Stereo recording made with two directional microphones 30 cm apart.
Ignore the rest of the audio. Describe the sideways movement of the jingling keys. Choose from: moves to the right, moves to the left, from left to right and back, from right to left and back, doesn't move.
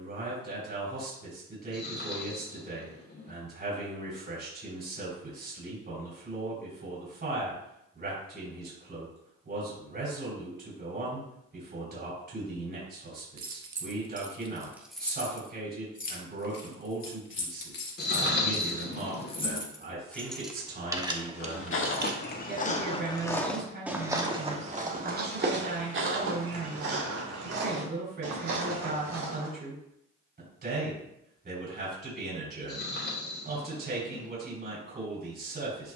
from right to left and back.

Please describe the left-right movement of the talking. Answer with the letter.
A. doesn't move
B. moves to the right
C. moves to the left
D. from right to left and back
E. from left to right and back
A.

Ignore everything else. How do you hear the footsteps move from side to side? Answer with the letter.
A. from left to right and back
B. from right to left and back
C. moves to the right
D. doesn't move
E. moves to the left
C.